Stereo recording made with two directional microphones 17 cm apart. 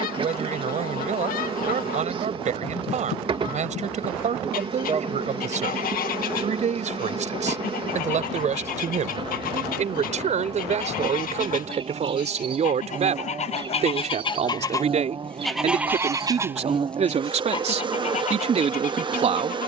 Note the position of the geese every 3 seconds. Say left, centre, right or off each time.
left, left, left, left, left, centre, left.